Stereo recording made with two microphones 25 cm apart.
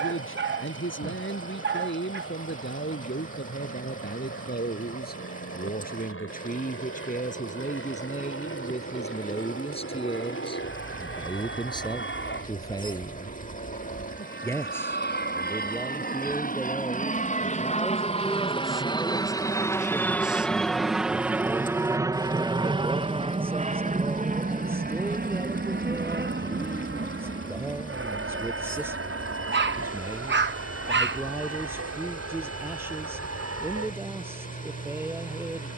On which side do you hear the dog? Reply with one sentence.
You can hear the dog on the right.